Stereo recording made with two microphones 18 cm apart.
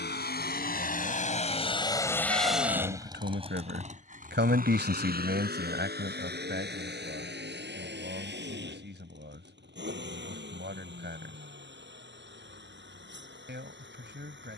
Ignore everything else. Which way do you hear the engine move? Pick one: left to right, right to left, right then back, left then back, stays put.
left to right.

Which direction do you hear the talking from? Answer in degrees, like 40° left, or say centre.
70° right.